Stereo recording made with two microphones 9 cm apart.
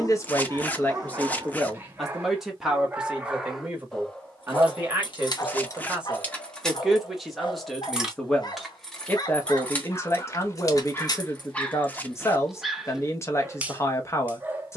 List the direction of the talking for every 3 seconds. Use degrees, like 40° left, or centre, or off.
10° left, 20° right, centre, 30° left, 30° left.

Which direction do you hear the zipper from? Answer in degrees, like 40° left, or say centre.
20° left.